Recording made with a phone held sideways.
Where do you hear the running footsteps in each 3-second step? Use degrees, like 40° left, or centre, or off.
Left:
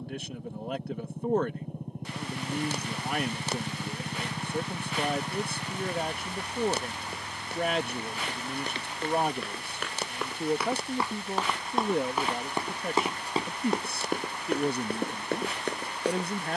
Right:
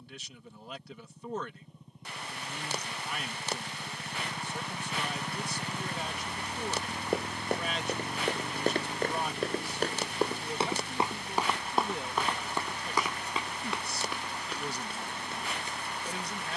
off, off, 50° right, 30° right, 40° left, 60° left.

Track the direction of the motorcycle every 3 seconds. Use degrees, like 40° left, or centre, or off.
60° left, 20° left, 30° right, 50° right, 60° right, 70° right.